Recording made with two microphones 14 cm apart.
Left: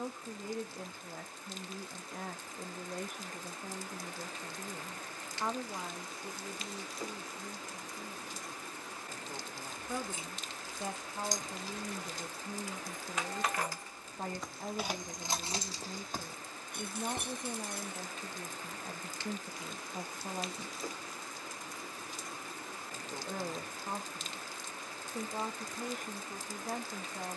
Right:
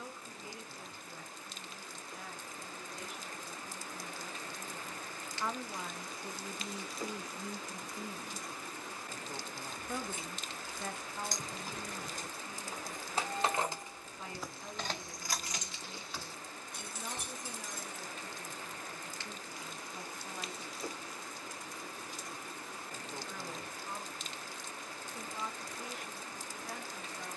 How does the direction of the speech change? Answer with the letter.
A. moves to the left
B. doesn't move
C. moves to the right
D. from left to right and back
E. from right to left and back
D.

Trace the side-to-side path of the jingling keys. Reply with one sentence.
You can hear the jingling keys move from right to left.